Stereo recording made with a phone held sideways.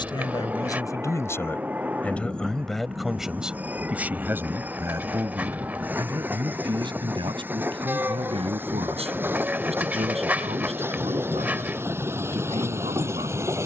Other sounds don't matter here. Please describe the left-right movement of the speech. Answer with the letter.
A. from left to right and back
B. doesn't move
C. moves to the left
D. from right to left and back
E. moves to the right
E.